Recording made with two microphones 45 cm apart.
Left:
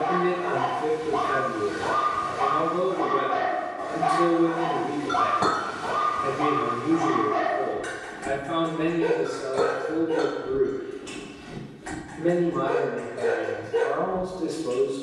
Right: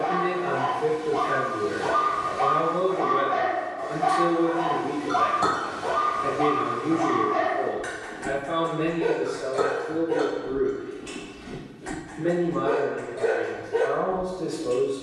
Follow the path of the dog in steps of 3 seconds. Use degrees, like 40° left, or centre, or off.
60° left, 40° left, centre, 40° right, 50° right.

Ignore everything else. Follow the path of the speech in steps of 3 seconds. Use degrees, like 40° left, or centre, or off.
20° left, centre, 20° right, 20° right, 10° left.